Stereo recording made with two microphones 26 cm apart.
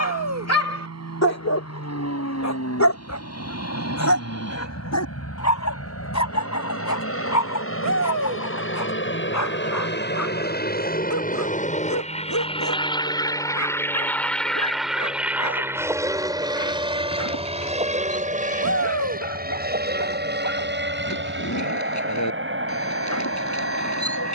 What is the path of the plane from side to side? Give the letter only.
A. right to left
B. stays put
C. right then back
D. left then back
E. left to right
E.